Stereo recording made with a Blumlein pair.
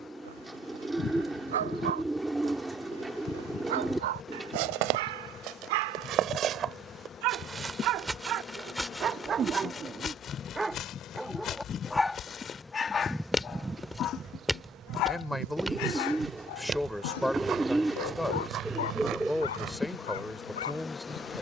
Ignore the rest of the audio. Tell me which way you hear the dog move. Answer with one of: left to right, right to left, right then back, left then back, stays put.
right to left.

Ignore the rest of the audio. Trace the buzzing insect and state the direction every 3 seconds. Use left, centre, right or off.
left, left, left, left, centre, right, centre.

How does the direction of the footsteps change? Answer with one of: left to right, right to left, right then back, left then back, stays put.
left then back.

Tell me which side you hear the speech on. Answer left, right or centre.
centre.